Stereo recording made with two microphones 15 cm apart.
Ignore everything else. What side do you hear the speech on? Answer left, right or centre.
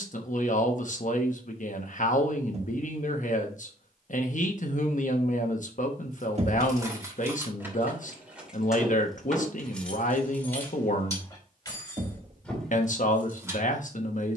left.